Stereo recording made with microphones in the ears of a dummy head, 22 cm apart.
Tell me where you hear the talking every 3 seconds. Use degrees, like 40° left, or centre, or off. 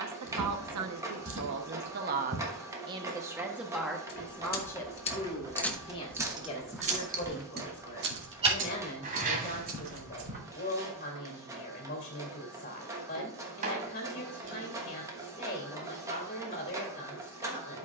50° right, 10° left, 30° left, 30° left, 30° left, 30° left.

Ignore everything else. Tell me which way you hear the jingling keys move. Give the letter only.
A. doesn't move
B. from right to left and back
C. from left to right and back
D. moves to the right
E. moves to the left
D.